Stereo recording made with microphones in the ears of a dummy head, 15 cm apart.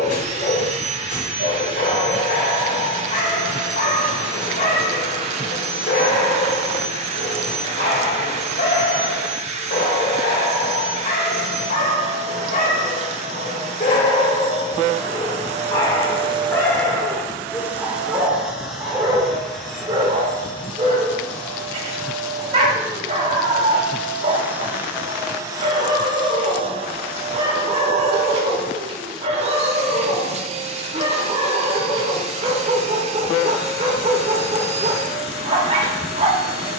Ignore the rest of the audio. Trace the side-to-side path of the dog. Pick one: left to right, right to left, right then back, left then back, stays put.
left to right.